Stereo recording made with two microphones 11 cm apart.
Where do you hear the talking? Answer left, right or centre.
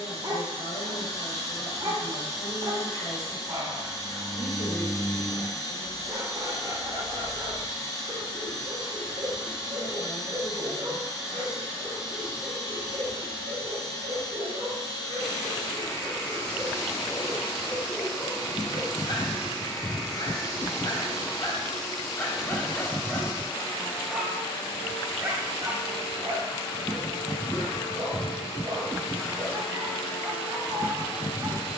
left.